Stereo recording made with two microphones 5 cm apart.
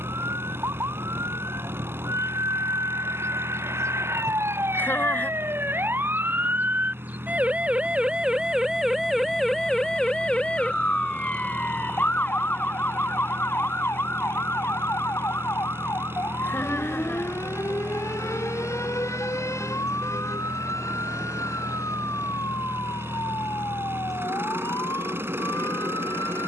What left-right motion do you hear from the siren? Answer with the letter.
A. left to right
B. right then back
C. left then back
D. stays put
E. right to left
E.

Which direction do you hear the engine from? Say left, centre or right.
right.